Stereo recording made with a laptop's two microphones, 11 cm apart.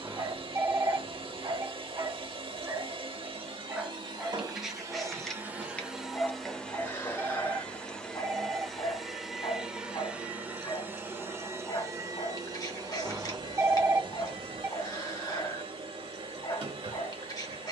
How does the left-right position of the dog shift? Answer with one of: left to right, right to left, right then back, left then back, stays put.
right to left.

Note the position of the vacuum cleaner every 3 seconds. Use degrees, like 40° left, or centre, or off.
50° right, 30° right, 10° left, 10° right, 40° right, 50° right.